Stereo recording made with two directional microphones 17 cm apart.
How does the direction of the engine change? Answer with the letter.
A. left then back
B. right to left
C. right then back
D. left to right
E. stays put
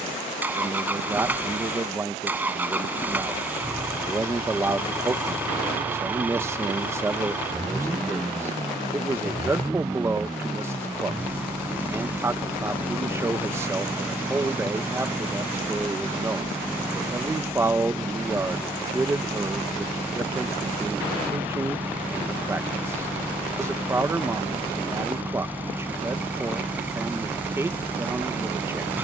E.